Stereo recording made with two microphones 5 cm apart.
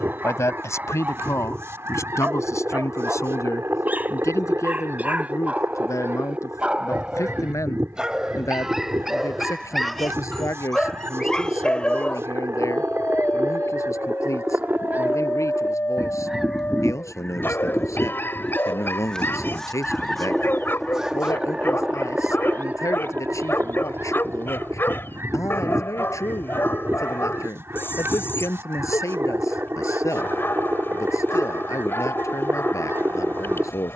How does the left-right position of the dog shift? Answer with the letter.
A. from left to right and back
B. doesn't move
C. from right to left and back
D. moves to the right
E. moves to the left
E.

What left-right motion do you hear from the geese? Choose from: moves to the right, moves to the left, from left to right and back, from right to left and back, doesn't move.
from right to left and back.